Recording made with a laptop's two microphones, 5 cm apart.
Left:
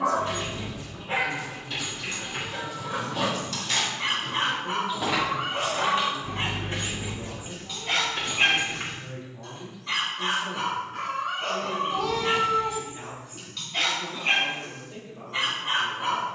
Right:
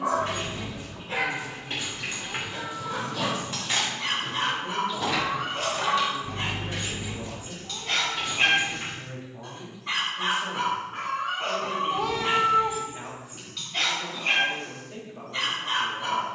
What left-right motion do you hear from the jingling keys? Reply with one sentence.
You can hear the jingling keys move from right to left.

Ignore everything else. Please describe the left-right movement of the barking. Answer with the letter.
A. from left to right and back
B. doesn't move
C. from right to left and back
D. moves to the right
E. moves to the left
A.